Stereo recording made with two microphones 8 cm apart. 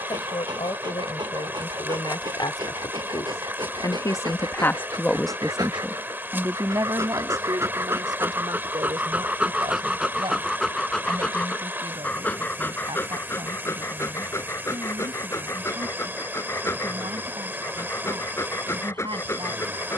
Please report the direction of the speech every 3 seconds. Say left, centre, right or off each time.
left, left, right, right, right, right, right.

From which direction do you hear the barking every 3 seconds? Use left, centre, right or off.
right, right, right, centre, left, left, left.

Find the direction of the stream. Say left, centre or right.
right.